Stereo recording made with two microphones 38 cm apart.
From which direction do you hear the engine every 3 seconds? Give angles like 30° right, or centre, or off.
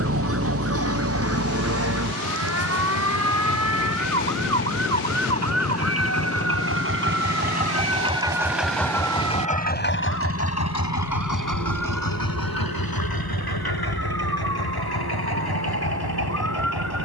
60° right, 50° right, 20° right, 40° left, 70° left, 80° left.